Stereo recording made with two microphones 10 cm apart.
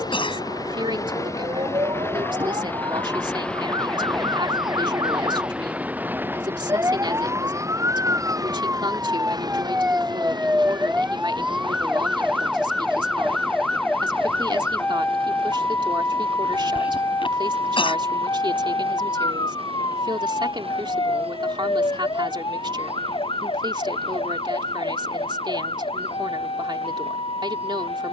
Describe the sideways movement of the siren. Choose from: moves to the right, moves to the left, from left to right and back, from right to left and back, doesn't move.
moves to the left.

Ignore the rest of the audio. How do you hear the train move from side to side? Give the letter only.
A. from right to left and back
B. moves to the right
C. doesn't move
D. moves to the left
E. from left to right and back
B.